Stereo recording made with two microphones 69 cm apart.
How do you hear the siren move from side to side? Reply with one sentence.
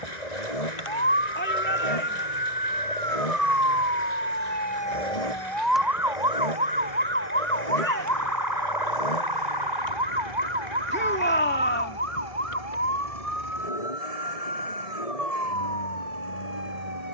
You can hear the siren go from the left side to the right.